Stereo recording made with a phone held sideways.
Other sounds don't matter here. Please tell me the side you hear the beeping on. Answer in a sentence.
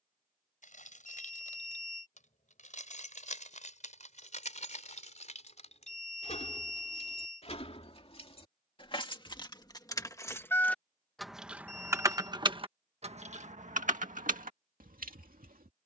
In this clip you hear the beeping on the left.